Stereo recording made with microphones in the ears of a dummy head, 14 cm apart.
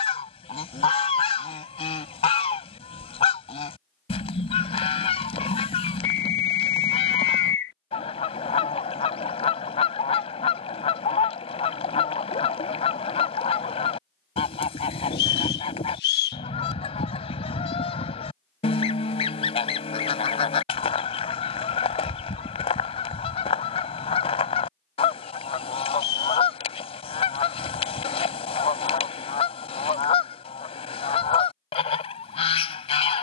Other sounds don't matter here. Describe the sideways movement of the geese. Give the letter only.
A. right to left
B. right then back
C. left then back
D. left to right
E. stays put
E.